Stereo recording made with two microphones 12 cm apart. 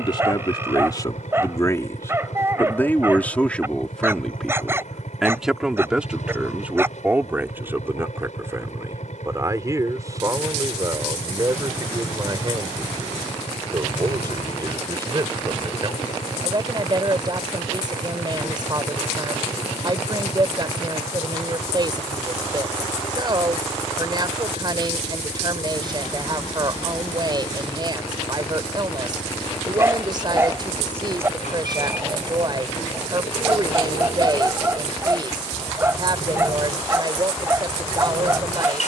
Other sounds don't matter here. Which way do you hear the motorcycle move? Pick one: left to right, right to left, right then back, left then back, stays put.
stays put.